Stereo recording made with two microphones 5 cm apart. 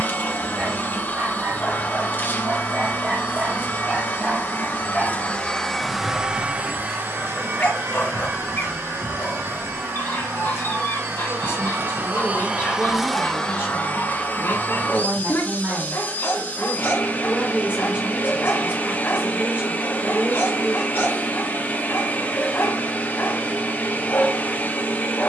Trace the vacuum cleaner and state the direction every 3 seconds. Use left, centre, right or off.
left, left, right, right, centre, left, left, left, left.